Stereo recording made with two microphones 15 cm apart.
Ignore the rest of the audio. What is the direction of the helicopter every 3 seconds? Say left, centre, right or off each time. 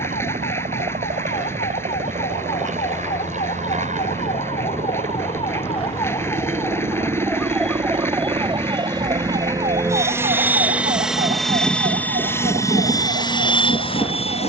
right, right, right, centre, left.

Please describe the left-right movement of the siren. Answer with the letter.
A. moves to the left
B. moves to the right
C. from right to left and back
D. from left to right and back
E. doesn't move
B.